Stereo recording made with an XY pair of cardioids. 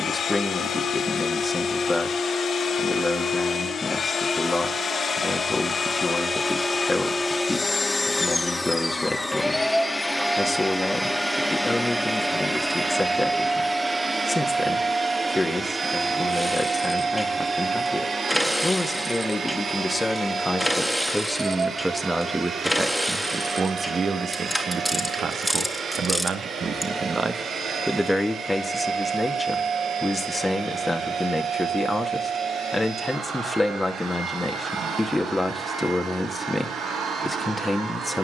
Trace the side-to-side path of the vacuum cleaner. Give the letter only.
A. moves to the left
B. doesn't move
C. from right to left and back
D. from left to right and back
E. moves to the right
E.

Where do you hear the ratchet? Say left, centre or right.
centre.